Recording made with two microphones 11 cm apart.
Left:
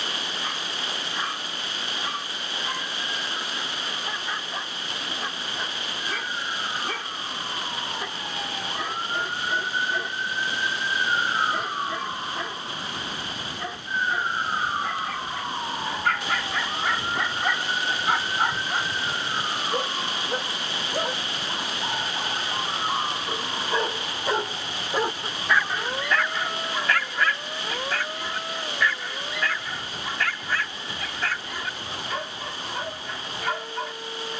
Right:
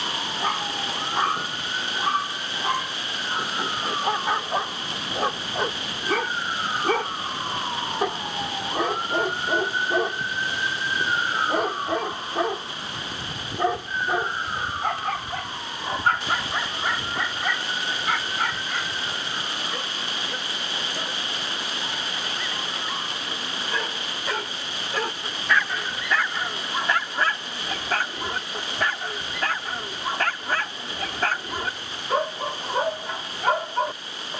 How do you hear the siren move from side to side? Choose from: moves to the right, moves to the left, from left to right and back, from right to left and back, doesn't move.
moves to the left.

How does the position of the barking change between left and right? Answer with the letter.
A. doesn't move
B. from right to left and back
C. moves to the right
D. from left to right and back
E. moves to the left
B.